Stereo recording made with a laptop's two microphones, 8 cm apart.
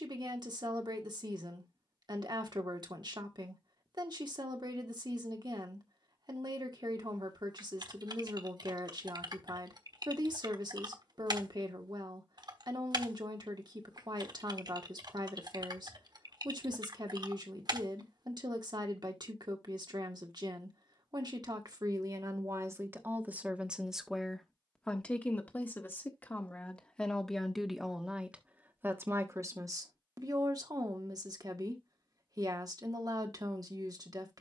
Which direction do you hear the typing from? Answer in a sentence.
You can hear the typing on the right.